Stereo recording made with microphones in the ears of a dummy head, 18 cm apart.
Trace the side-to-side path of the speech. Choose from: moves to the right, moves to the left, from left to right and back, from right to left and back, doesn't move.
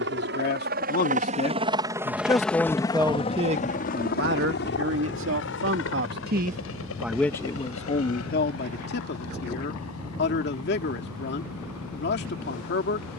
from left to right and back.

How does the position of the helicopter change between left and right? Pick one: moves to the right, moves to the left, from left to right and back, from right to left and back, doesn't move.
moves to the left.